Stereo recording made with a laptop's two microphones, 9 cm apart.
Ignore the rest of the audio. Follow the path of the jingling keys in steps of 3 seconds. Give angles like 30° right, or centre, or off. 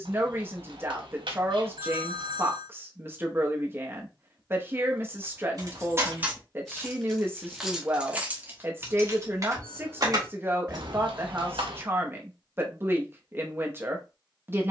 off, 40° right, 10° right, 40° right, off.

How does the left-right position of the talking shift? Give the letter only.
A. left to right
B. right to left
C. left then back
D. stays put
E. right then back
D.